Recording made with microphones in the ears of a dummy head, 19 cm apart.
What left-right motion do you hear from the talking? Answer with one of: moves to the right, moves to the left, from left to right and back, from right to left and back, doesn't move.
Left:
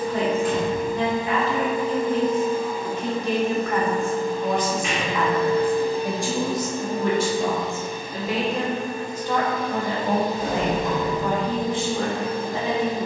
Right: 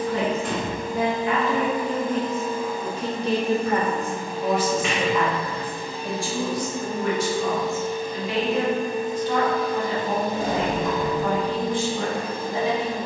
moves to the left.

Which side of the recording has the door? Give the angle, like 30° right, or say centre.
60° right.